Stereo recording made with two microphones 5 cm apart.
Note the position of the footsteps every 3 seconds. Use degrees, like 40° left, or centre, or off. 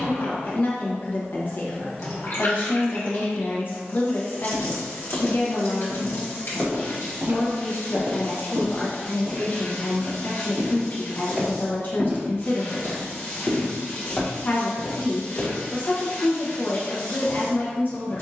off, 20° left, 40° right, 40° right, 10° left, 40° left.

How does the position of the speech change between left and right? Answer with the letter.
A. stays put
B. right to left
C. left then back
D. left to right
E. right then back
A.